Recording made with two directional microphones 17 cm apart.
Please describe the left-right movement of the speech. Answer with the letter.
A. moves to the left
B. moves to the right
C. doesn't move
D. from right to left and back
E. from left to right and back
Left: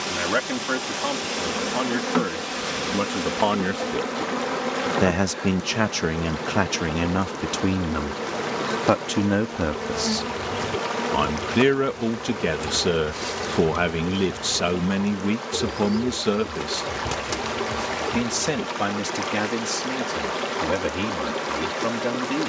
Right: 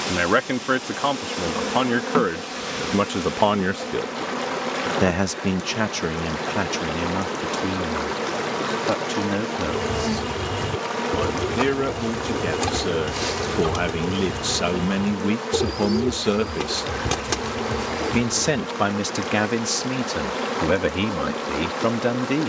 D.